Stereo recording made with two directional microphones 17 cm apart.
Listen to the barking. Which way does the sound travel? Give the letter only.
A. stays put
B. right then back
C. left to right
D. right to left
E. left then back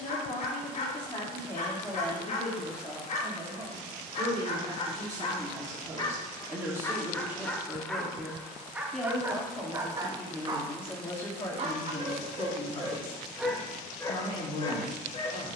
B.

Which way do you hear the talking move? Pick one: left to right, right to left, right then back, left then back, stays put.
right then back.